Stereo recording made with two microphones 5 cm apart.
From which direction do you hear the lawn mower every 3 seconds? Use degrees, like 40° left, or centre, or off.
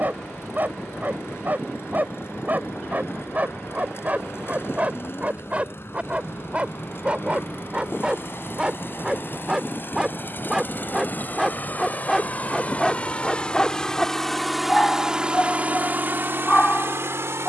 60° left, 60° left, 50° left, 40° left, 20° left, 50° right.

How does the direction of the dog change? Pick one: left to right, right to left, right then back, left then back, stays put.
right to left.